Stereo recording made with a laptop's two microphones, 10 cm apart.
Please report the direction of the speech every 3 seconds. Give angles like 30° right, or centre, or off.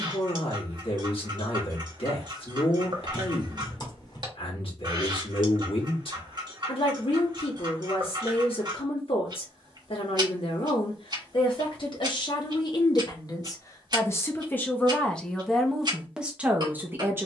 60° left, 60° left, 60° left, 60° left, 30° left, 10° right.